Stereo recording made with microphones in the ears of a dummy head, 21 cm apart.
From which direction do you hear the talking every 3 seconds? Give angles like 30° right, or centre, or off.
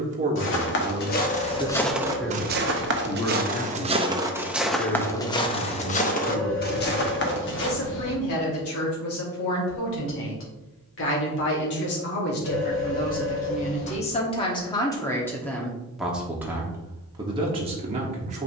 20° right, 40° left, 60° left, 60° left, 30° left, 10° right.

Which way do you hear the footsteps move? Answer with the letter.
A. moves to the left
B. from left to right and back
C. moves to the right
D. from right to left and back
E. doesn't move
B.